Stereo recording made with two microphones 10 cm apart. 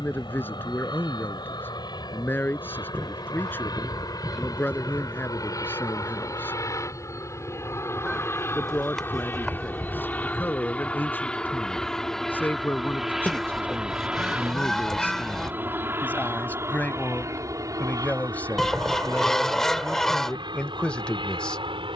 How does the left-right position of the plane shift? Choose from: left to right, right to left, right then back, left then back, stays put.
left to right.